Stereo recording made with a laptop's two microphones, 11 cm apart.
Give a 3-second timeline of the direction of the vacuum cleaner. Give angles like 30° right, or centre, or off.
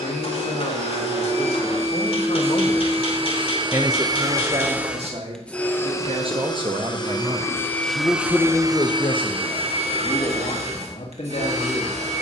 70° right, 20° right, 10° left, 70° right.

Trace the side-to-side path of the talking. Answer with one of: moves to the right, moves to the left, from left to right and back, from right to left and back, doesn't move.
from left to right and back.